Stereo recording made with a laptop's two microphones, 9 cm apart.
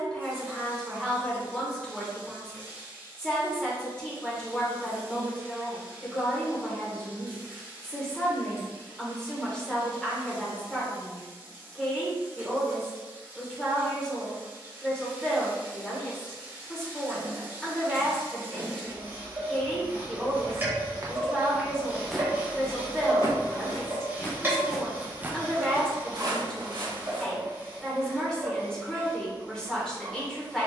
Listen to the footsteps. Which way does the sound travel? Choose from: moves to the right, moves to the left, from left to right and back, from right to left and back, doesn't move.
from right to left and back.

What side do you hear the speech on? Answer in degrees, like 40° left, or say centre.
10° left.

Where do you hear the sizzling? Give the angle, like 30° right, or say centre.
30° right.